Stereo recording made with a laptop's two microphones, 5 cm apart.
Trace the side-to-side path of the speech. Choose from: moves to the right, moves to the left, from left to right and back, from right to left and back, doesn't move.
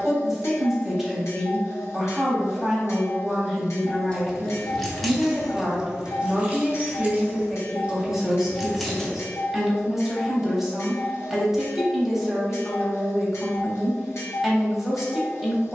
doesn't move.